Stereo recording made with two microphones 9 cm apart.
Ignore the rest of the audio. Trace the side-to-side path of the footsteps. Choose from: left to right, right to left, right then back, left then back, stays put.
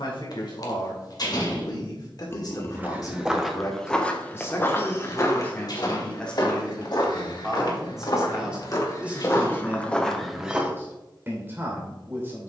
left then back.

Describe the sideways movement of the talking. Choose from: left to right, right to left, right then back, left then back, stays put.
left to right.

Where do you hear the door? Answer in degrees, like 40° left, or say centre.
50° left.